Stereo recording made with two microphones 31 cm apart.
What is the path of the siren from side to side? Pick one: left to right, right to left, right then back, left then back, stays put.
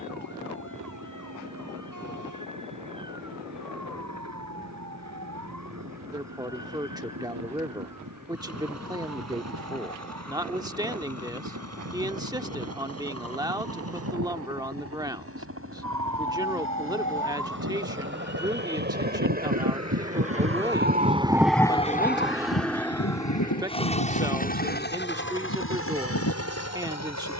right to left.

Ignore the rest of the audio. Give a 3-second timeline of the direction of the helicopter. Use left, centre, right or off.
right, right, right, right, right, right, right, centre, left.